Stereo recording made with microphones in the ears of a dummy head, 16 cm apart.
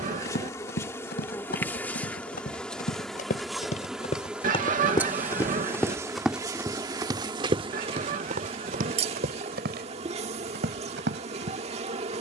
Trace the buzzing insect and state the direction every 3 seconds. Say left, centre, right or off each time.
centre, centre, right, right.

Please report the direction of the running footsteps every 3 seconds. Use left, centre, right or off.
left, left, right, right.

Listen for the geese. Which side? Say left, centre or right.
right.